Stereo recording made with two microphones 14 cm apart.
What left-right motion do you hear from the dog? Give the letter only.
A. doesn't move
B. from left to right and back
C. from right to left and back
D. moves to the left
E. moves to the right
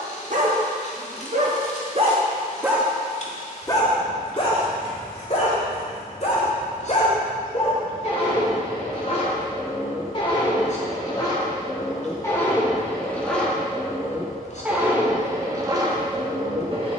C.